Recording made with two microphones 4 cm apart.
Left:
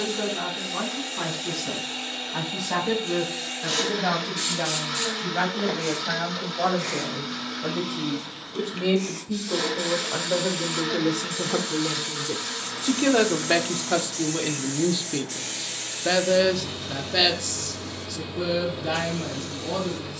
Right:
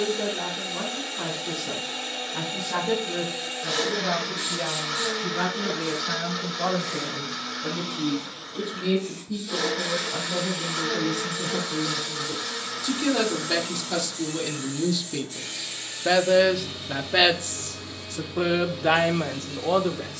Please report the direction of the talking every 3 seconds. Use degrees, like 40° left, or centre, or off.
80° left, 80° left, 70° left, 60° left, 40° left, 10° right, 50° right.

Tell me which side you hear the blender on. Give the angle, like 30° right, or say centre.
10° left.